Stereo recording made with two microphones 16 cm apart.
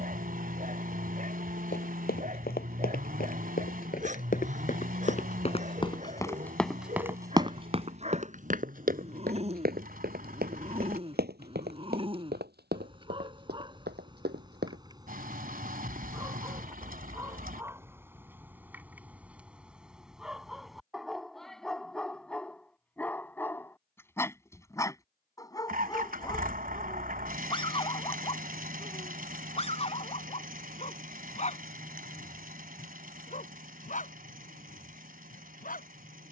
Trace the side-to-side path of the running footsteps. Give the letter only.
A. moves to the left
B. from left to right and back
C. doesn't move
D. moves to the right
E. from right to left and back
D.